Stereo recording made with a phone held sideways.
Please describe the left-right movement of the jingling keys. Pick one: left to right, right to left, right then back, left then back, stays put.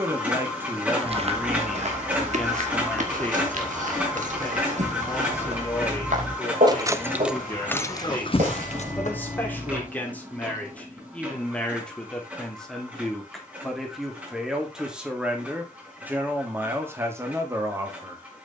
right to left.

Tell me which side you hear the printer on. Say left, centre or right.
centre.